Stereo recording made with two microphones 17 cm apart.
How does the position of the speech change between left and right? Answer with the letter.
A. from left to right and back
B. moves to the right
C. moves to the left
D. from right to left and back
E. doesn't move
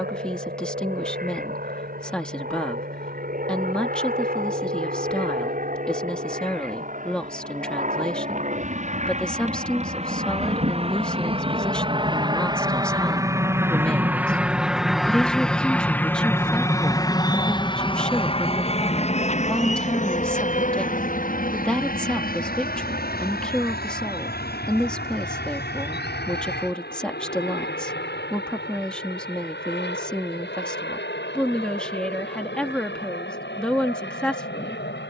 E.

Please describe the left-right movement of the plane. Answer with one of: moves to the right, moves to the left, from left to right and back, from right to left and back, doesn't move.
moves to the left.